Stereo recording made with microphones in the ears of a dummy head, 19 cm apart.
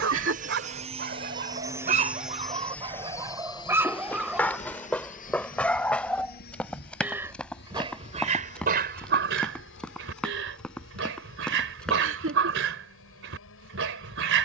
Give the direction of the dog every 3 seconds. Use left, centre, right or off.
right, centre, right, right, right.